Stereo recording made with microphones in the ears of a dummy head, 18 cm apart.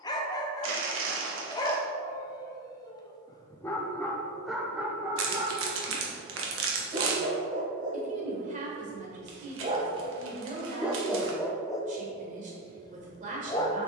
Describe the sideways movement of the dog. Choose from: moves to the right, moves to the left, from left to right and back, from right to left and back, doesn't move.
from left to right and back.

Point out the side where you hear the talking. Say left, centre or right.
right.